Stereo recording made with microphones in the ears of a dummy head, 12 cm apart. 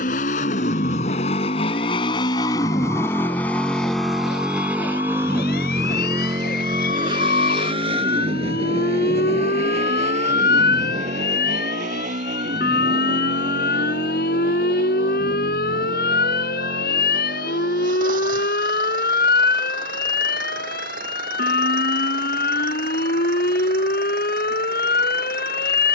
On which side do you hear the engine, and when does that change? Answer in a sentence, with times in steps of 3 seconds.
You can hear the engine on the left from 0 s, in the centre from 3 s and on the right from 6 s.